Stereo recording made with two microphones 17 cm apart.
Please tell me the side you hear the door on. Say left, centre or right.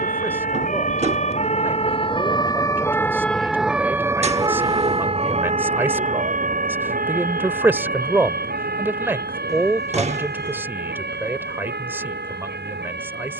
right.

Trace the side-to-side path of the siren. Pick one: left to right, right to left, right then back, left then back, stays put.
left to right.